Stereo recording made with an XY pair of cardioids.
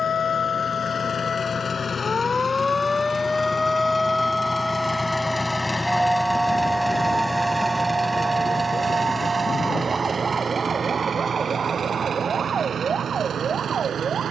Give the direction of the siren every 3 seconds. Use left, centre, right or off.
left, centre, right, right, right.